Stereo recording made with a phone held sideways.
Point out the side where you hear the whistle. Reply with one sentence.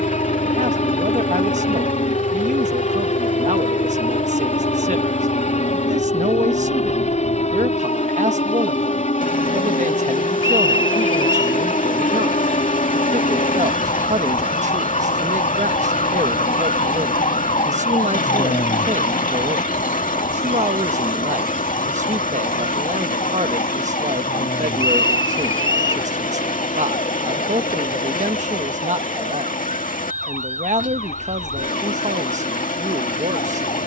In this clip you hear the whistle on the right.